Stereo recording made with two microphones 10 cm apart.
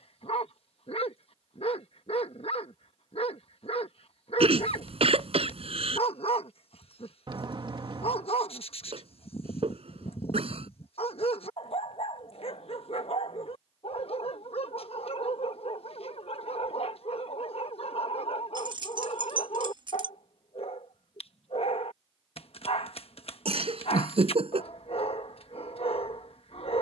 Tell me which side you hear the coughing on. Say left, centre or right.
right.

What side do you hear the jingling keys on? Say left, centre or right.
right.